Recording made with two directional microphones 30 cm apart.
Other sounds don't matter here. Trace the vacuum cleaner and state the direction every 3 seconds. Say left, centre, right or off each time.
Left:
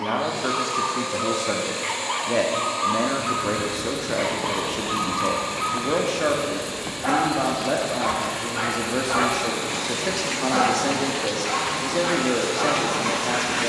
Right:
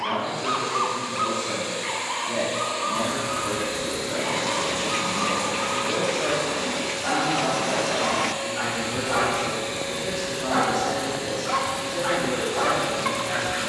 left, right, right, left, left.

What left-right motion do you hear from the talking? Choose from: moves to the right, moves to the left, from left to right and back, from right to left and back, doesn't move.
doesn't move.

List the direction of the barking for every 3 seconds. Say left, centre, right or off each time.
centre, left, left, centre, centre.